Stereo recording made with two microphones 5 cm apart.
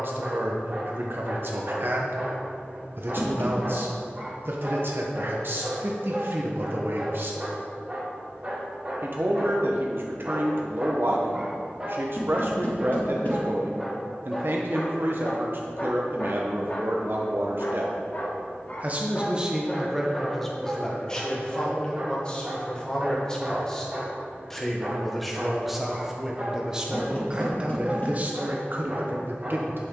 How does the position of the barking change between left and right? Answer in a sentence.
In this clip you hear the barking move from right to left and back again.